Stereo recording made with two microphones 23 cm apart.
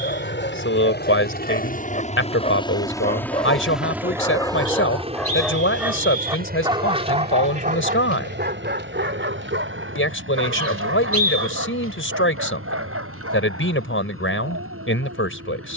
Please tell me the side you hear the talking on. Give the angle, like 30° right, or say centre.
60° left.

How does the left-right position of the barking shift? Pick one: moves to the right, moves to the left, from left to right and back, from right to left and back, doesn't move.
moves to the right.